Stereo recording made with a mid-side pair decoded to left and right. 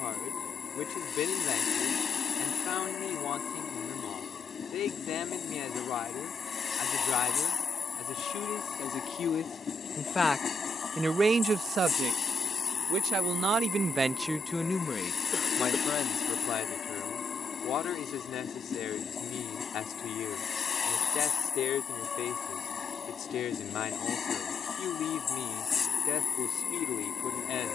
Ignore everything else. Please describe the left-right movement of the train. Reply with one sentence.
In this clip you hear the train stay put.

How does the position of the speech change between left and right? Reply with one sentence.
In this clip you hear the speech move from left to right and back again.